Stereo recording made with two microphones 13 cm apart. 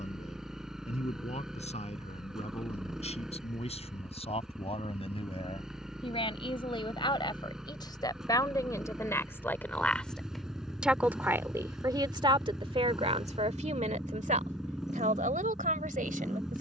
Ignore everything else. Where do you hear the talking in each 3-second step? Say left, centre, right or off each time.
left, left, left, centre, right, right.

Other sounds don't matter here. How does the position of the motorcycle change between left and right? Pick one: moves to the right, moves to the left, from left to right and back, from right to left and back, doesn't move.
doesn't move.